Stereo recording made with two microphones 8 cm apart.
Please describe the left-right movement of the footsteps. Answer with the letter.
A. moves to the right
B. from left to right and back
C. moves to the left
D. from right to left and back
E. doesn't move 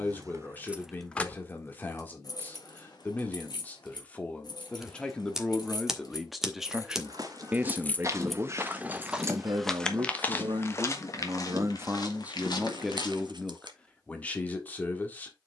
C.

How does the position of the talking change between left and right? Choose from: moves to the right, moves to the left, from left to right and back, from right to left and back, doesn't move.
from left to right and back.